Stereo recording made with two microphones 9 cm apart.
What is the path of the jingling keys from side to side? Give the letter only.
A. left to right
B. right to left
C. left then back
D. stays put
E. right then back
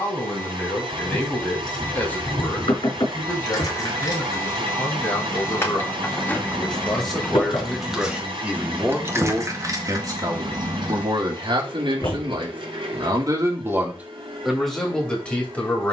A.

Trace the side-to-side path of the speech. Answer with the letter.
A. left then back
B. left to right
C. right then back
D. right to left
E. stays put
C.